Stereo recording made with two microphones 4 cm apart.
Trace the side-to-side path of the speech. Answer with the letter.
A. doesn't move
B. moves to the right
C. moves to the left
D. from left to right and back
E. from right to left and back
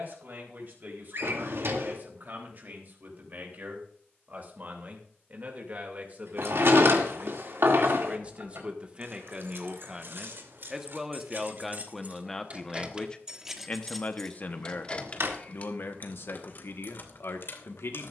C.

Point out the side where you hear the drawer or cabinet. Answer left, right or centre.
right.